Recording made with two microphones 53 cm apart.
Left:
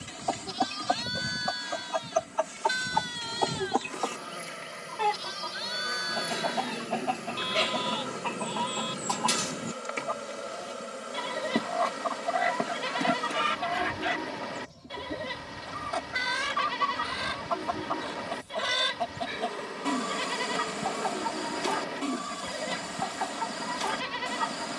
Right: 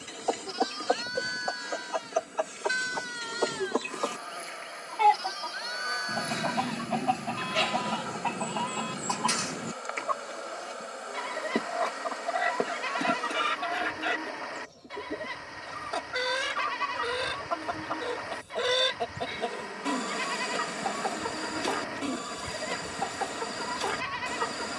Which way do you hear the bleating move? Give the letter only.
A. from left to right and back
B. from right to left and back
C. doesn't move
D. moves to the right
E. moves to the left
C.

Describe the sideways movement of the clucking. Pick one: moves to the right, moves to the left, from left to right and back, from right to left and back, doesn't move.
from left to right and back.